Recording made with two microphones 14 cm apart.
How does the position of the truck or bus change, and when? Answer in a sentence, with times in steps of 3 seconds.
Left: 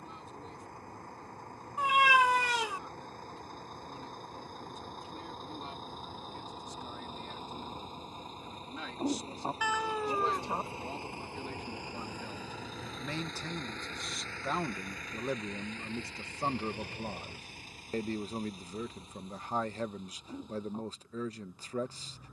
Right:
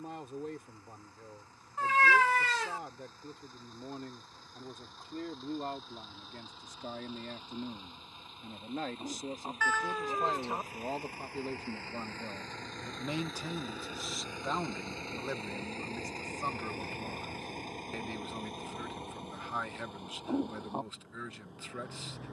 In this clip you hear the truck or bus on the left from 0 s, in the centre from 12 s and on the right from 15 s.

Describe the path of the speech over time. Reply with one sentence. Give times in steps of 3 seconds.
In this clip you hear the speech on the right from 0 s, in the centre from 12 s and on the left from 15 s.